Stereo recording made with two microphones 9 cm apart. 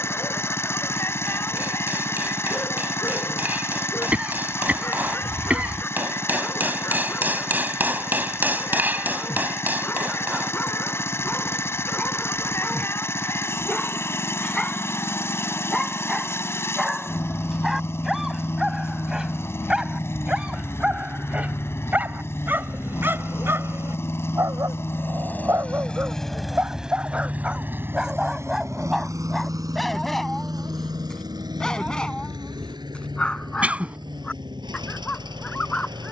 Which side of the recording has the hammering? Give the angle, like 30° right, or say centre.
20° right.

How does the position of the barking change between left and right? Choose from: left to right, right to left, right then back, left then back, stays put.
right then back.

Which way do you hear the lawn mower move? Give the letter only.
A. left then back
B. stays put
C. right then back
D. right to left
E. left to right
E.